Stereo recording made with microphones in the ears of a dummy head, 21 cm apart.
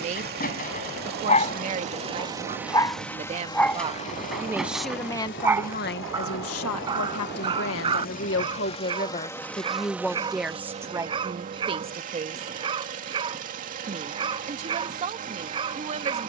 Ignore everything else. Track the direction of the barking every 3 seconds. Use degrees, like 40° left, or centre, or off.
30° left, centre, 20° right, 20° right, 20° right, 20° right.